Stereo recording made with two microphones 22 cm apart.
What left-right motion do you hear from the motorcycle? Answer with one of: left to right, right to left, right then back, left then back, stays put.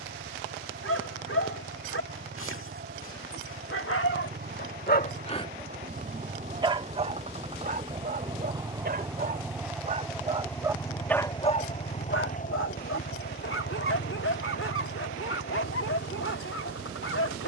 right to left.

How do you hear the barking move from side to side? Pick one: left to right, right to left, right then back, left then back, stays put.
right then back.